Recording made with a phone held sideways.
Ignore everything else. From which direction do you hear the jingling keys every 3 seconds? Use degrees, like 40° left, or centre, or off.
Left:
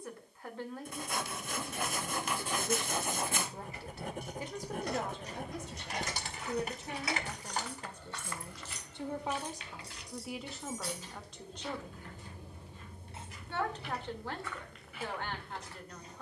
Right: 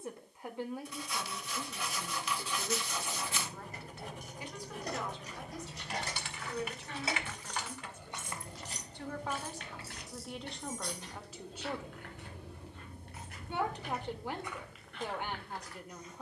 off, 40° right, 30° right, centre, 30° left, off.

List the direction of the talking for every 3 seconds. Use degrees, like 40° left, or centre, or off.
centre, 40° left, 40° left, 10° left, 20° right, 20° right.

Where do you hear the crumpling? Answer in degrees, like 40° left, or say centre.
40° left.